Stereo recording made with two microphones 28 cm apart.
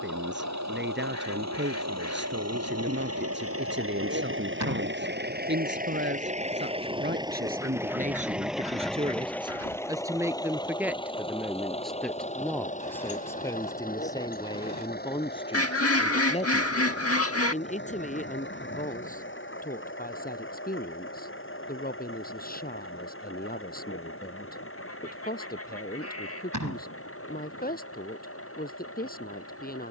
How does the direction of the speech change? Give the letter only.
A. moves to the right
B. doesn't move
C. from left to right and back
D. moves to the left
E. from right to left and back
D.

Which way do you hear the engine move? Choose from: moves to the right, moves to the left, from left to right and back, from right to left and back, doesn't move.
moves to the left.